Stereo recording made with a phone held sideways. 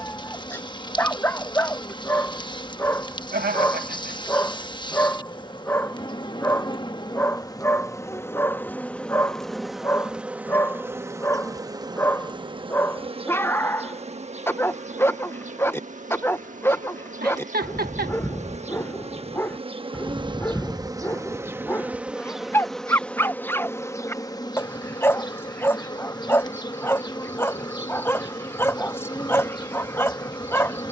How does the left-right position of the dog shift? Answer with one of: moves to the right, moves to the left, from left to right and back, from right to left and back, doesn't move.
doesn't move.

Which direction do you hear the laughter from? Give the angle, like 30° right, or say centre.
80° right.